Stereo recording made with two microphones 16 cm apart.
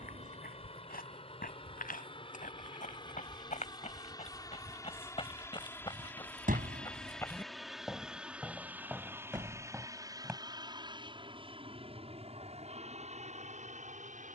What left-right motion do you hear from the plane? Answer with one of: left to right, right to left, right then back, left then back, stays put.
left to right.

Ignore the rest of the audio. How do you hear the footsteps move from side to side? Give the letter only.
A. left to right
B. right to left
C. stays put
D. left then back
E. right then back
A.